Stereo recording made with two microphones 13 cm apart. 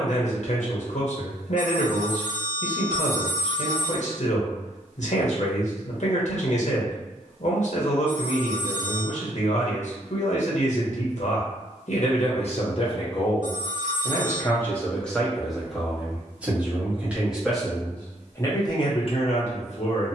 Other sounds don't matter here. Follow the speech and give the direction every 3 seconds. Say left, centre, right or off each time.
left, left, left, left, left, centre, left.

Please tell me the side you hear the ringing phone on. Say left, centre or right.
right.